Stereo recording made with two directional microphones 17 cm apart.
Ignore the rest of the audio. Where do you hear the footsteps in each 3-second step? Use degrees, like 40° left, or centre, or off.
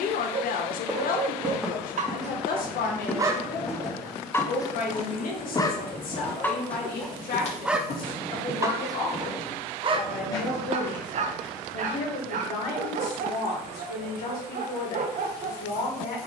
centre, 20° left, 40° left, 30° left, off, off.